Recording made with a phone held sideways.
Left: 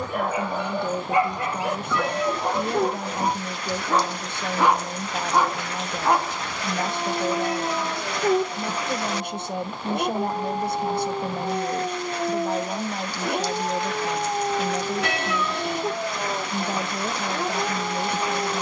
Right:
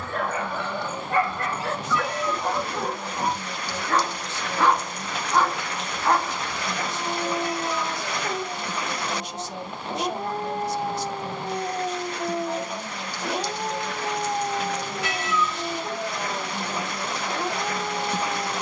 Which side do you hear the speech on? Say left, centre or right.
left.